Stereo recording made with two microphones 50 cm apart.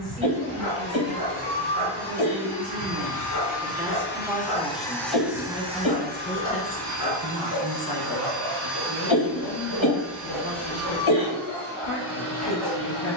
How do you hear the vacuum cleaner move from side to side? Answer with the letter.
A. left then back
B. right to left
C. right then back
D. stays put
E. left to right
E.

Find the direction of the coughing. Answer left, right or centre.
left.